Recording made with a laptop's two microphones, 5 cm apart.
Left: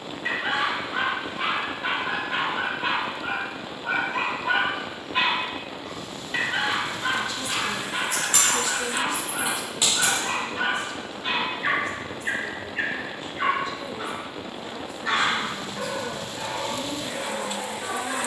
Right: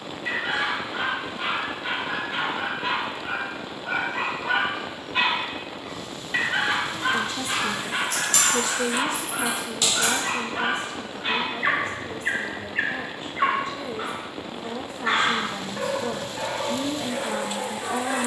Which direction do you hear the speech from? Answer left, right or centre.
right.